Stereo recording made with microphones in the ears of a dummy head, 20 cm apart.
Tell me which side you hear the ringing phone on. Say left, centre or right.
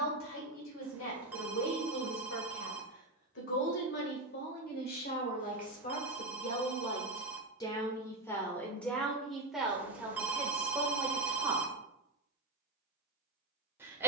centre.